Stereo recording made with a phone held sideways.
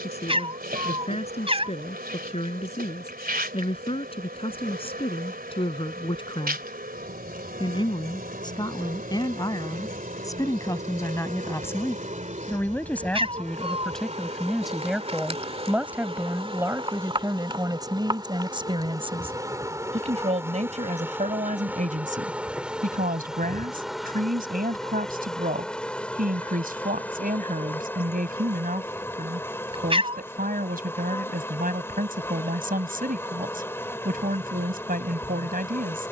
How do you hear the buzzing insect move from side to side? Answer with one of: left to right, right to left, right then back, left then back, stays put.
right to left.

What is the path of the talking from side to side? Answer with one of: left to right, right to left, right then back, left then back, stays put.
left to right.